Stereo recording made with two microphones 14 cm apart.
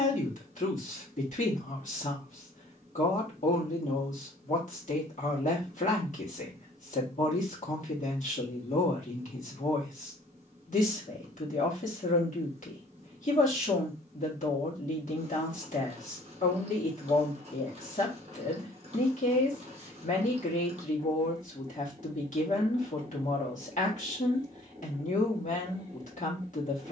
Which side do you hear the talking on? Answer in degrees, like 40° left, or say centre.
60° left.